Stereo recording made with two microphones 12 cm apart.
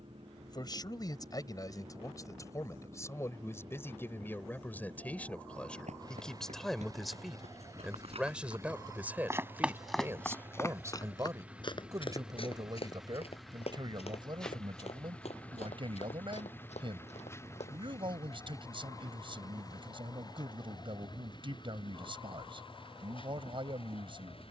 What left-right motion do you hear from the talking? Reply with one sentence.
You can hear the talking go from the left side to the right.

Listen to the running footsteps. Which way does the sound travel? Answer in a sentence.
In this clip you hear the running footsteps move from right to left.